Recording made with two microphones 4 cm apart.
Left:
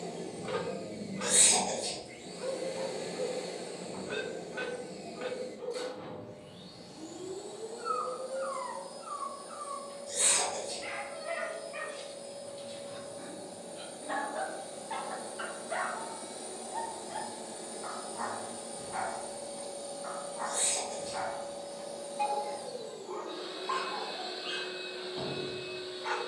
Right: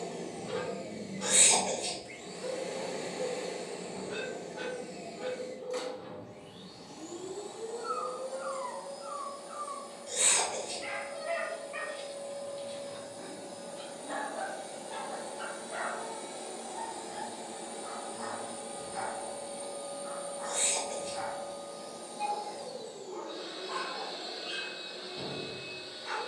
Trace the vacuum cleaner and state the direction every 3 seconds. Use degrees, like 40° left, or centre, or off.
80° right, 80° right, 80° right, 80° right, 70° right, 50° right, 30° right, centre, 20° left.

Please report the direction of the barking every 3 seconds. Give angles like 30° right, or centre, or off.
60° left, 60° left, 40° left, centre, 10° left, 50° left, 60° left, 60° left, 60° left.